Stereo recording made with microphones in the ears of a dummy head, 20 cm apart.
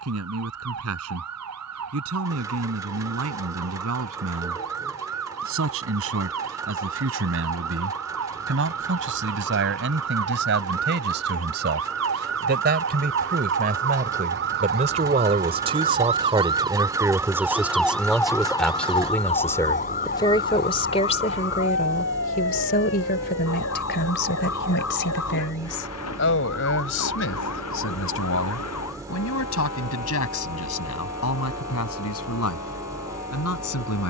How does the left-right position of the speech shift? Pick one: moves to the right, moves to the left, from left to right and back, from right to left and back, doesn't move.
moves to the left.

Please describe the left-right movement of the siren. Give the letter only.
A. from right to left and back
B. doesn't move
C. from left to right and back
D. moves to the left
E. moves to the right
D.